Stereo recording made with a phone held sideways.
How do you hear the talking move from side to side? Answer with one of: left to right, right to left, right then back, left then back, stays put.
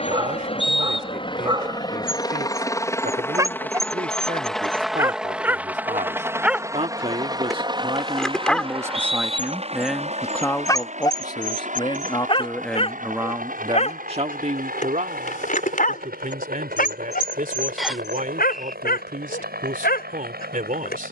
left then back.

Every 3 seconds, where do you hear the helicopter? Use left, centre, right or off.
left, centre, right, right, right, right, right.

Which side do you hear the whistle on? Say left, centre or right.
centre.